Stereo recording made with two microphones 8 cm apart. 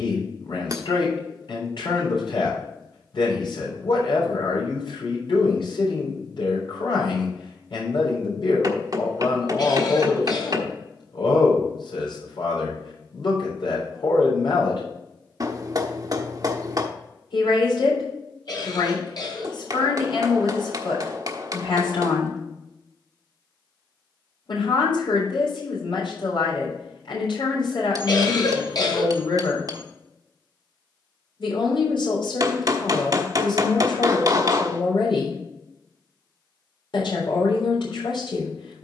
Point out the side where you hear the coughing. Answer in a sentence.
You can hear the coughing on the left.